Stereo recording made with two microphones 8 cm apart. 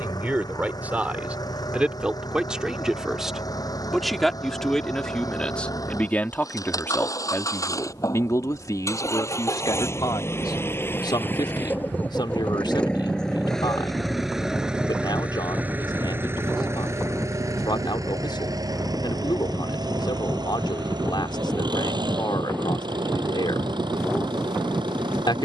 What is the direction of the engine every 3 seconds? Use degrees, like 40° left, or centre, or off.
60° left, 50° left, 50° left, 30° left, 10° left, 30° right, 60° right, 70° right, 80° right.